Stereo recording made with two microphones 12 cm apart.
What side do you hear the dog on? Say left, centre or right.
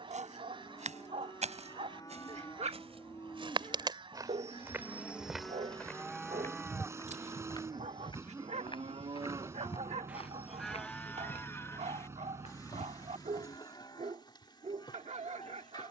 right.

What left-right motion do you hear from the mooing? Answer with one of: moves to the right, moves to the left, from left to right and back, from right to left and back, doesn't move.
from left to right and back.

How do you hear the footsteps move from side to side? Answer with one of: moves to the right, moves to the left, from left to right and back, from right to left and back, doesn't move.
moves to the left.